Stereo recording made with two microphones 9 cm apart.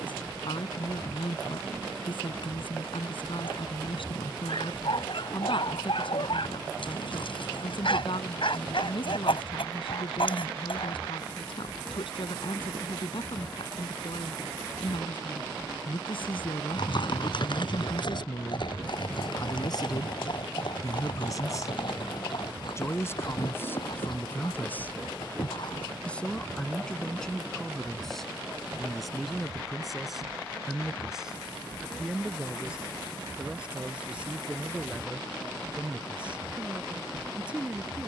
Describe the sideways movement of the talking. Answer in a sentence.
You can hear the talking go from the left side to the right.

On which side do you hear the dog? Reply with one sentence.
In this clip you hear the dog on the left.